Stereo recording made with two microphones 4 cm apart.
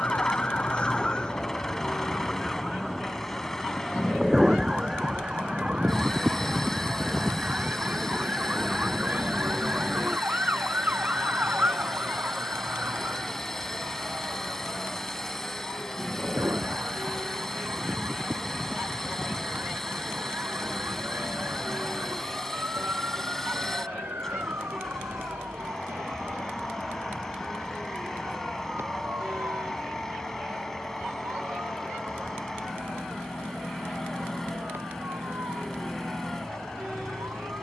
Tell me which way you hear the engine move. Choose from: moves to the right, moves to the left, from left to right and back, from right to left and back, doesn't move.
doesn't move.